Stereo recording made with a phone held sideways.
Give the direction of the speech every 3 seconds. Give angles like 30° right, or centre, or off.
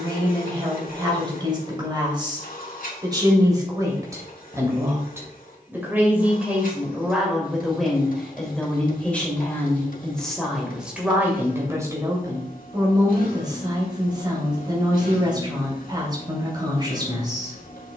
30° right, 20° right, centre, centre, 30° right, 30° right.